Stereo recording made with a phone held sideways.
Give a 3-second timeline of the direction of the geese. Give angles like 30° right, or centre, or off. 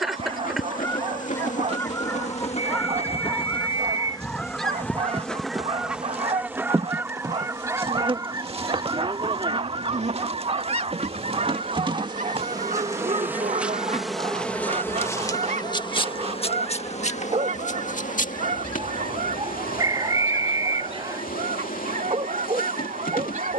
20° left, centre, 20° right, 40° right, 60° right, 60° right, 60° right, 60° right.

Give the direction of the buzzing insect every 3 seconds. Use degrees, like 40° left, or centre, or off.
50° left, 20° left, 30° right, 40° right, 10° right, 40° left, 60° left, 70° left.